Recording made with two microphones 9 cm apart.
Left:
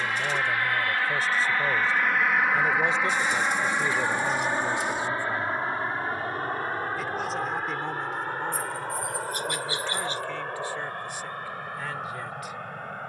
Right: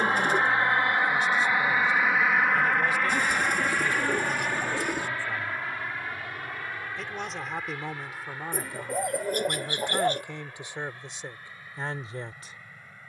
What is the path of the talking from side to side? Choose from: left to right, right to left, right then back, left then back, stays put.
left to right.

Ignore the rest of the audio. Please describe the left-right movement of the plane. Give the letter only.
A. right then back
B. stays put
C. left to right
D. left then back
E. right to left
E.